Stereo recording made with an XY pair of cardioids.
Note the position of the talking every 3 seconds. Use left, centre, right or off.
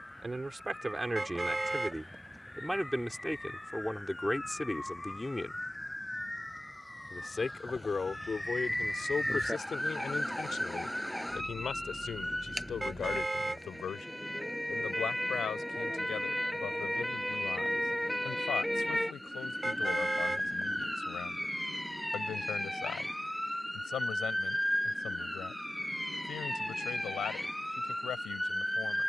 centre, centre, left, left, left, left, left, left, left, left.